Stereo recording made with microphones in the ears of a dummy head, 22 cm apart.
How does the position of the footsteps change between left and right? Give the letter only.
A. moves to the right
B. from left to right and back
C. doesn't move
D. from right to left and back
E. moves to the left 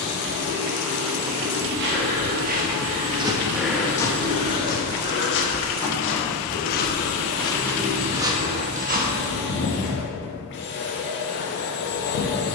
D.